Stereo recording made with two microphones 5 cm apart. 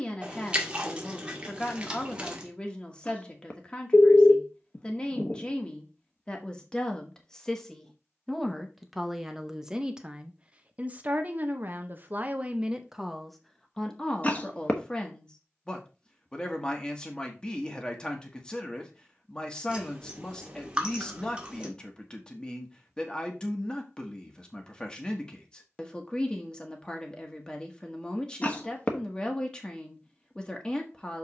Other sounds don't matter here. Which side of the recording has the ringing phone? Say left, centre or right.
left.